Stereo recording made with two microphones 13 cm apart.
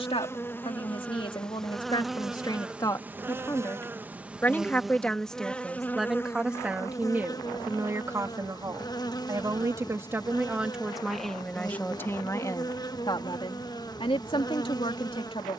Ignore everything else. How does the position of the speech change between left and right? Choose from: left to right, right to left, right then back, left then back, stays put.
right then back.